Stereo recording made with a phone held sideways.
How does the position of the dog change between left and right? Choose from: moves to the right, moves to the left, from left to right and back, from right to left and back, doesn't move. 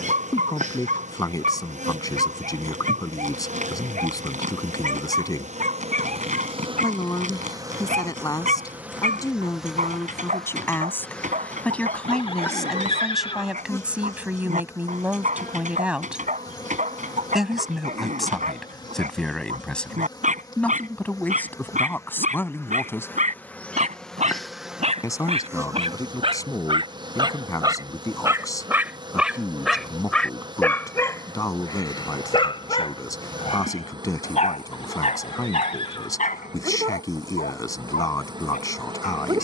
moves to the left.